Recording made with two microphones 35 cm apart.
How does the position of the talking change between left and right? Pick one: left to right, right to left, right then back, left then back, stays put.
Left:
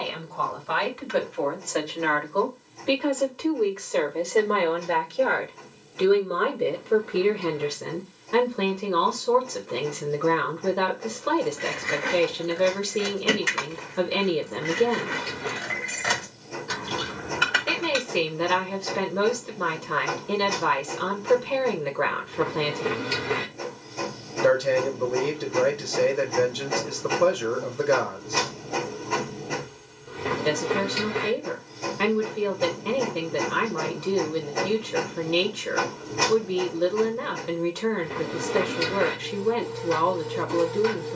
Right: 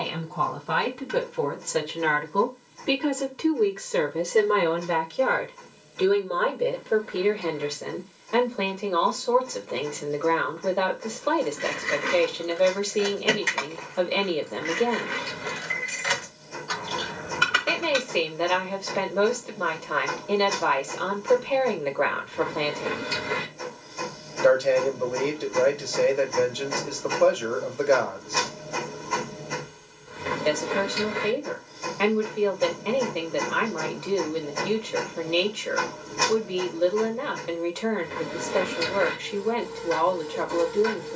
right to left.